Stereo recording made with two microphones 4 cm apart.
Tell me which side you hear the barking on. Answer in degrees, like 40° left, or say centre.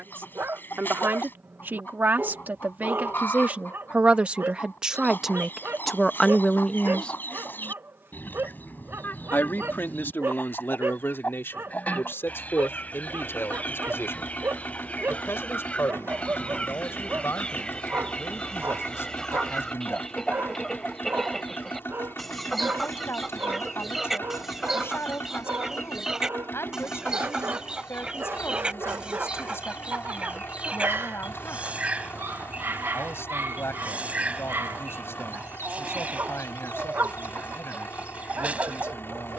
70° right.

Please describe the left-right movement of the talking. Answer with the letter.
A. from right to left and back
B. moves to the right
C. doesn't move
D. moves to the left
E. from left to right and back
D.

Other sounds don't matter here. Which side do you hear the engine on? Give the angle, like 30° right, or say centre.
70° left.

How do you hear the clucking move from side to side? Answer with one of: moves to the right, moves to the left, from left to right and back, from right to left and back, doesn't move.
moves to the right.